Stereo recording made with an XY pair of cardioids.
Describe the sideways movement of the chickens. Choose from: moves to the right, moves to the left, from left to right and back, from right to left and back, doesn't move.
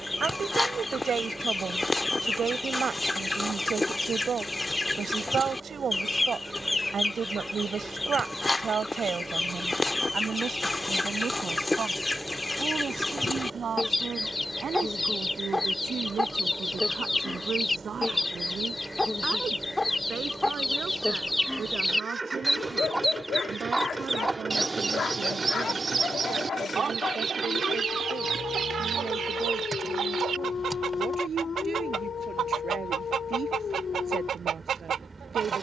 moves to the right.